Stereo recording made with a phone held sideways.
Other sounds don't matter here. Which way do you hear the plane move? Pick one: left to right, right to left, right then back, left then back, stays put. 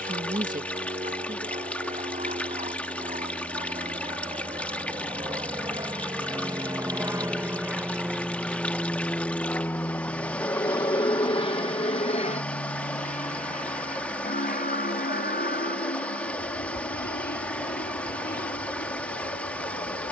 right to left.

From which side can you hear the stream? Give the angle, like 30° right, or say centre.
10° left.